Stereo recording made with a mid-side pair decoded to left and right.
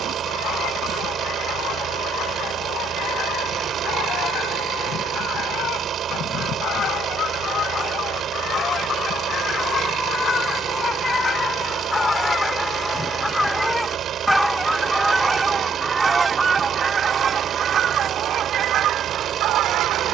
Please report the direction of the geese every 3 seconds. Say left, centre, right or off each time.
left, left, left, left, centre, right, right.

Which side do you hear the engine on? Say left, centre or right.
right.